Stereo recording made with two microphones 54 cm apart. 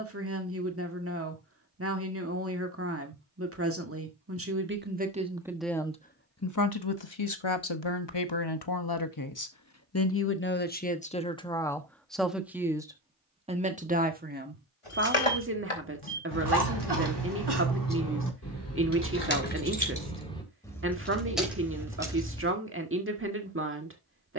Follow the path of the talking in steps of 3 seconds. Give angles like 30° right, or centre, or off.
20° right, 20° right, 50° left, 20° left, 10° right, 20° right, 20° right, 20° right.